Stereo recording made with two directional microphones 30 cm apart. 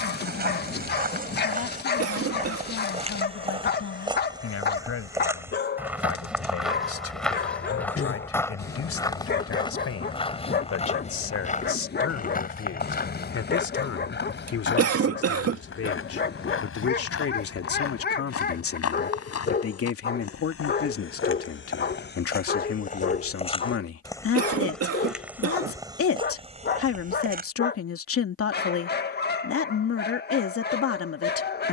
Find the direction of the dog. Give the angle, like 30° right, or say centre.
30° left.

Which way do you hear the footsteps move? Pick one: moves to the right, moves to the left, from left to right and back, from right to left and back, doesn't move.
from right to left and back.